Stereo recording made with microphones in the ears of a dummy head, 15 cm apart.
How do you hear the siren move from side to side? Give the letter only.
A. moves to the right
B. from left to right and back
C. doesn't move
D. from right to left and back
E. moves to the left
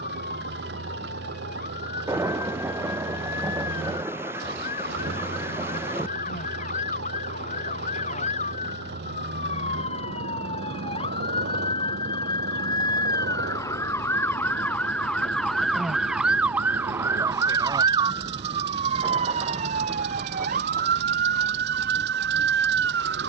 A.